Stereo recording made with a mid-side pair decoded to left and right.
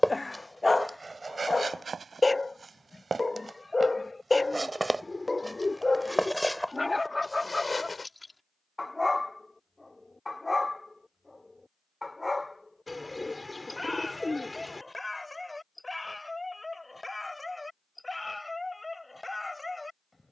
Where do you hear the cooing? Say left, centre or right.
centre.